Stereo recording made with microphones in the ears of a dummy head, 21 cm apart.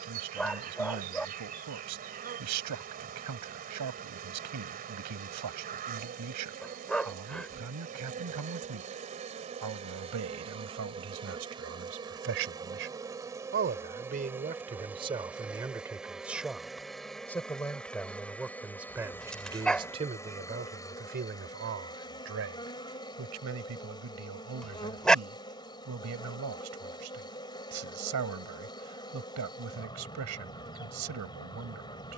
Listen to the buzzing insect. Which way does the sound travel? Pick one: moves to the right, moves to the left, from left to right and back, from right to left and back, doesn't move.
moves to the left.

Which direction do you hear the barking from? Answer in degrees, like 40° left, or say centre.
centre.